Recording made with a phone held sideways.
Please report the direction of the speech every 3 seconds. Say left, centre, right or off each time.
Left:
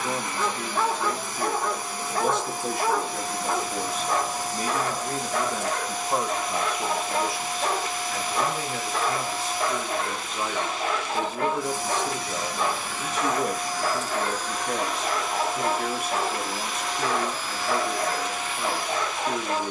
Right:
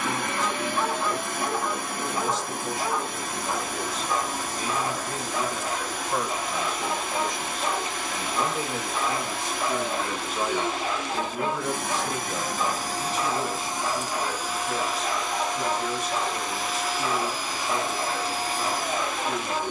left, left, centre, centre, left, left, left.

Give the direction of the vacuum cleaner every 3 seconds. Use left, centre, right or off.
right, right, right, right, right, centre, right.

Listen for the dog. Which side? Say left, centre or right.
left.